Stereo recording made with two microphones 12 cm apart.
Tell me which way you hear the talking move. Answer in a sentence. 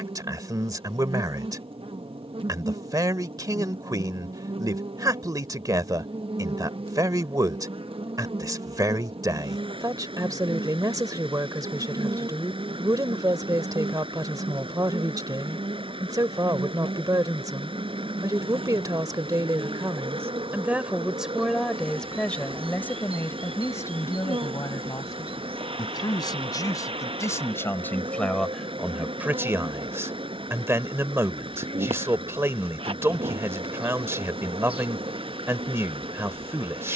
In this clip you hear the talking go left and come back.